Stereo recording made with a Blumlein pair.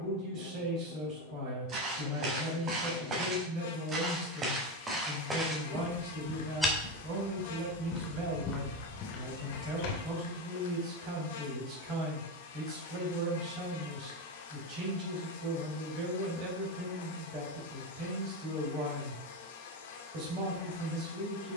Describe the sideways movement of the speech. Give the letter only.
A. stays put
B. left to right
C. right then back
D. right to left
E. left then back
A.